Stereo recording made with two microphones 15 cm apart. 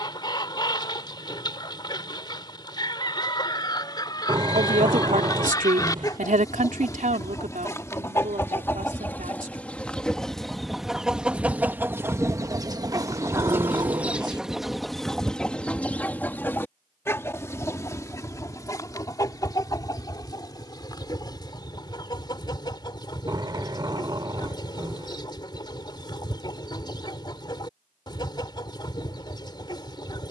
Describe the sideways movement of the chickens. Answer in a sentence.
In this clip you hear the chickens go right and come back.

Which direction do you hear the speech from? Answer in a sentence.
You can hear the speech on the right.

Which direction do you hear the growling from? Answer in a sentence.
You can hear the growling on the right.